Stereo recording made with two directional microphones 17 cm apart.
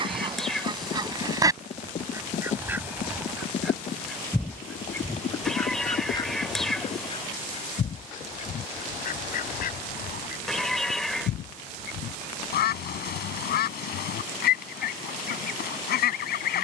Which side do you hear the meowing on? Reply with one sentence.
In this clip you hear the meowing in the centre.